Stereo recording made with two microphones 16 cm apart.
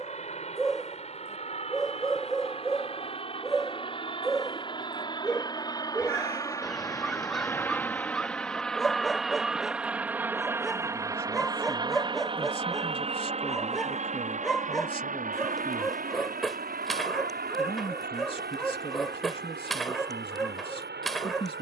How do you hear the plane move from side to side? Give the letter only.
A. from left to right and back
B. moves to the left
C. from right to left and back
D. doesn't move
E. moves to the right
E.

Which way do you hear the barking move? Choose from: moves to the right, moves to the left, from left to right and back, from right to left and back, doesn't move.
doesn't move.